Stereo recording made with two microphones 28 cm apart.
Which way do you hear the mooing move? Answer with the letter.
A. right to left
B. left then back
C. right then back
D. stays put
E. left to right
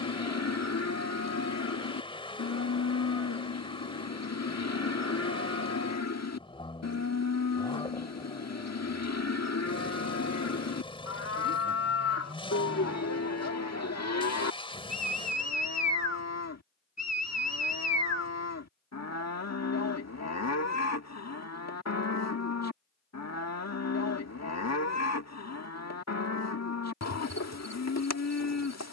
D.